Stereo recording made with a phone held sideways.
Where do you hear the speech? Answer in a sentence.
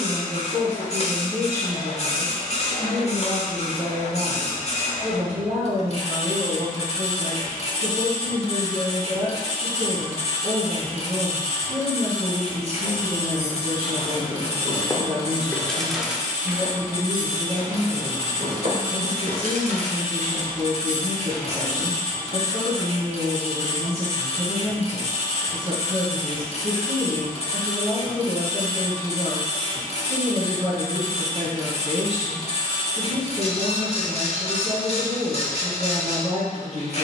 In this clip you hear the speech on the right.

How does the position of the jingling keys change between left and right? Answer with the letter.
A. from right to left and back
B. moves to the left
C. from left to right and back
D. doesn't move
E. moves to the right
E.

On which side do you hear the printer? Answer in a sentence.
You can hear the printer on the left.